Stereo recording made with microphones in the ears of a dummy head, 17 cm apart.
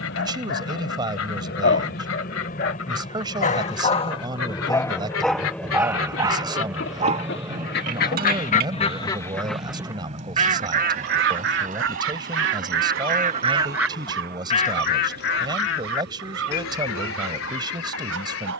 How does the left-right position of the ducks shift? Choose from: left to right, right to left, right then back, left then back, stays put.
right then back.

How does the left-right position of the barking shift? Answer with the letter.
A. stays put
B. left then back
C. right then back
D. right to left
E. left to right
E.